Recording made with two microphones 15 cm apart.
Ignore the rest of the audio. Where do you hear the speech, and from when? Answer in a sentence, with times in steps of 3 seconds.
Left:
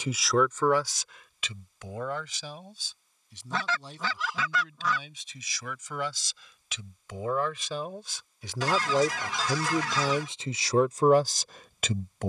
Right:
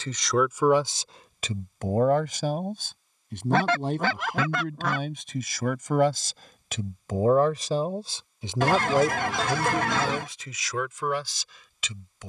You can hear the speech on the right from 0 s and on the left from 9 s.